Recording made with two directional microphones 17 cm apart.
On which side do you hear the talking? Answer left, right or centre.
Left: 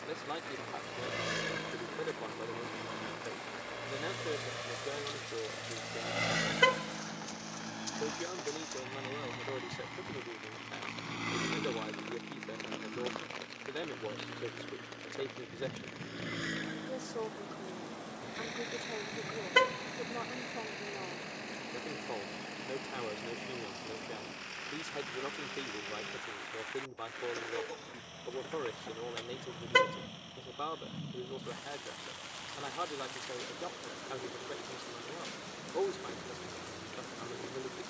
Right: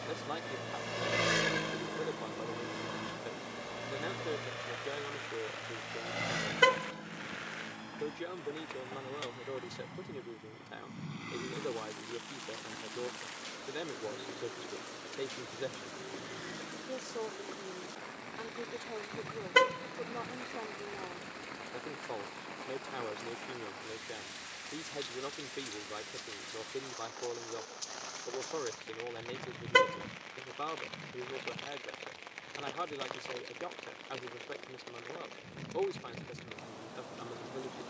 centre.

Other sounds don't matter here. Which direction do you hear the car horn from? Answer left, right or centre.
centre.